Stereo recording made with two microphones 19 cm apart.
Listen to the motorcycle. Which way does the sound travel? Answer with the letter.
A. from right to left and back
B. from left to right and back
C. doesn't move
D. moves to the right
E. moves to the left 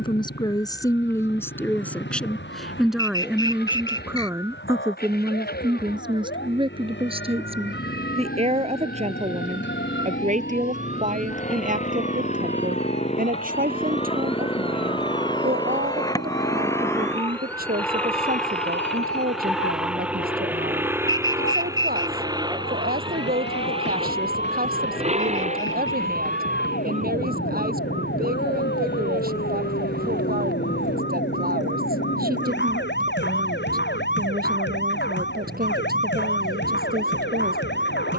D.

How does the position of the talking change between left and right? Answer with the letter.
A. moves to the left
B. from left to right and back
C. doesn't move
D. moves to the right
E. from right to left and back
D.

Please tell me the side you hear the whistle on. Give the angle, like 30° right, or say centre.
20° left.